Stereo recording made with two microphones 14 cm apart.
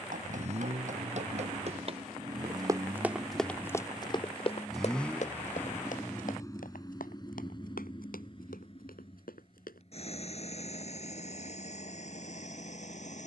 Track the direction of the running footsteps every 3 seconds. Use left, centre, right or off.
right, left, left, left, off.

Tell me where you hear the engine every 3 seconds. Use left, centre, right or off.
right, centre, left, left, left.